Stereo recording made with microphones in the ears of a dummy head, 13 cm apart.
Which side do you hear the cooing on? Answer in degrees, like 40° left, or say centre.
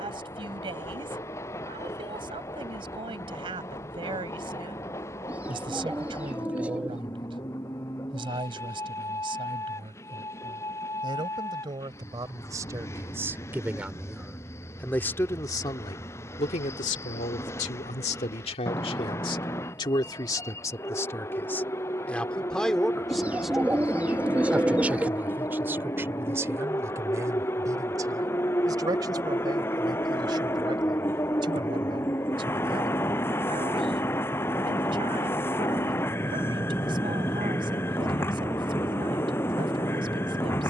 10° right.